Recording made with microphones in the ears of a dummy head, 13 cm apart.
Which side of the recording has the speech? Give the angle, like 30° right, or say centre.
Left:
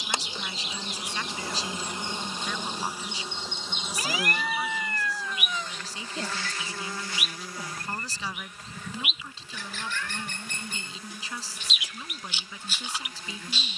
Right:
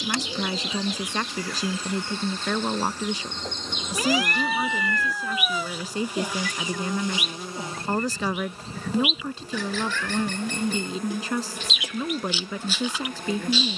50° right.